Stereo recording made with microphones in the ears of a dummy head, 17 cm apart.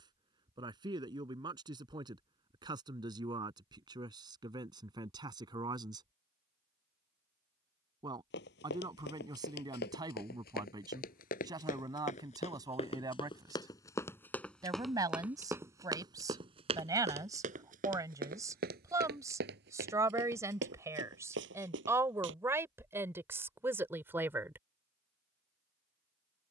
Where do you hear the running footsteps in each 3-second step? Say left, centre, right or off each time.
off, off, left, left, left, right, right, right, off.